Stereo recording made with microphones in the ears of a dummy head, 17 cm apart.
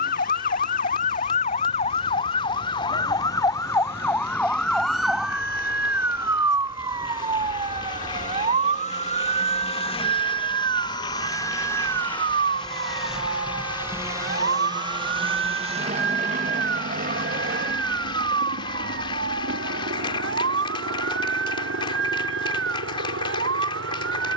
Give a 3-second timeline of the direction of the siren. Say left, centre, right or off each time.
left, centre, right, right, right, right, right, right.